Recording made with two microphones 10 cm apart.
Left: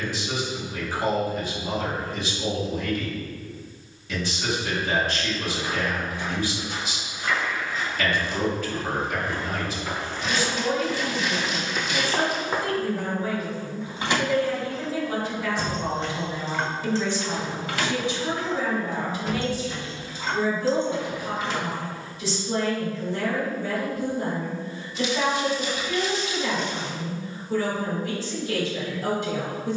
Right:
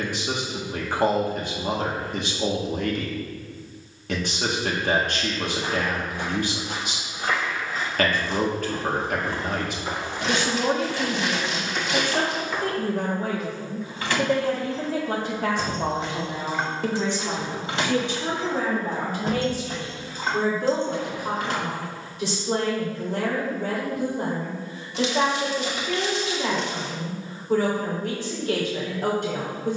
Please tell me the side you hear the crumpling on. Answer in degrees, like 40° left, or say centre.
70° right.